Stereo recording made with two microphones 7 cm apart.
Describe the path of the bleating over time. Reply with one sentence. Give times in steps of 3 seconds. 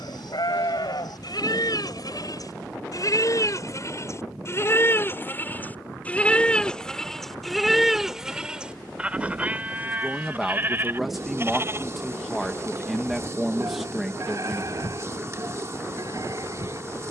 You can hear the bleating on the left from 0 s, in the centre from 6 s and on the right from 9 s.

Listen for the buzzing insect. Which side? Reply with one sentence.
In this clip you hear the buzzing insect on the right.